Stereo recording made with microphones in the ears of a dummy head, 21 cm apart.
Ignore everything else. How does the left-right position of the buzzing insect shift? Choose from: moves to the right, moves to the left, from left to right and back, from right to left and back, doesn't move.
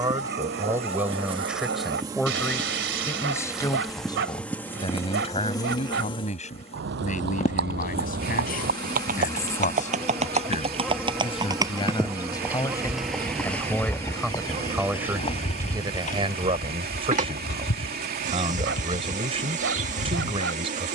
from right to left and back.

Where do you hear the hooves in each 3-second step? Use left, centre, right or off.
off, off, right, right, centre, left, left.